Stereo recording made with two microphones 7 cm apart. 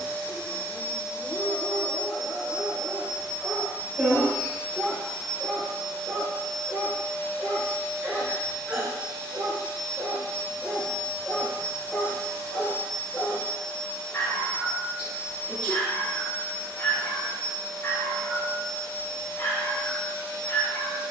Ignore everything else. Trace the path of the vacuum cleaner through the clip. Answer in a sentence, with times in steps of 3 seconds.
You can hear the vacuum cleaner on the right from 0 s, in the centre from 3 s and on the left from 6 s.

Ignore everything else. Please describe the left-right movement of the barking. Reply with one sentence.
In this clip you hear the barking move from left to right and back again.